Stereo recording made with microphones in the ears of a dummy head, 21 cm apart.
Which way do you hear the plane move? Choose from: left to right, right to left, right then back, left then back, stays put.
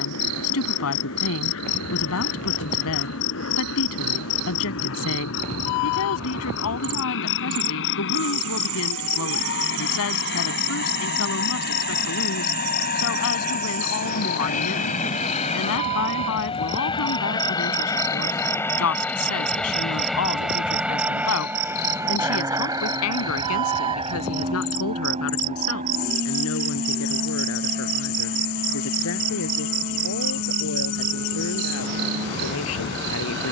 left to right.